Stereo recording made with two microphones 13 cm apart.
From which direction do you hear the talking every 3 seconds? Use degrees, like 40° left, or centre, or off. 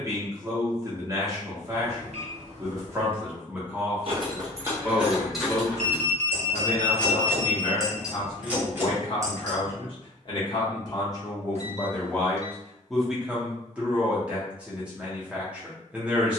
20° right, centre, 40° left, 30° left, centre, 10° right.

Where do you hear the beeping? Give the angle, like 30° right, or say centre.
60° right.